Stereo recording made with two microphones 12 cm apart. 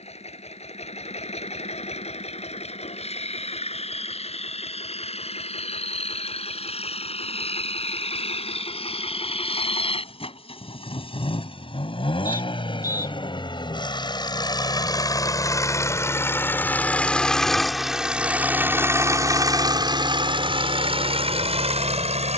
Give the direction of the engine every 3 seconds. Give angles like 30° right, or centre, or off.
60° left, 60° left, 60° left, 50° left, 40° left, 20° left, 30° right, 60° right.